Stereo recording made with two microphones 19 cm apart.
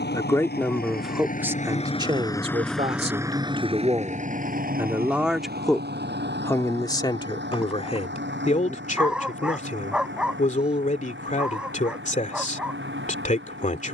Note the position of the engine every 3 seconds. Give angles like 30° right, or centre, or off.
40° left, 40° right, 70° right, 80° right, 80° right.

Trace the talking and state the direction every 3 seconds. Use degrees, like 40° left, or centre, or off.
10° right, 20° right, 30° left, 40° left, 40° left.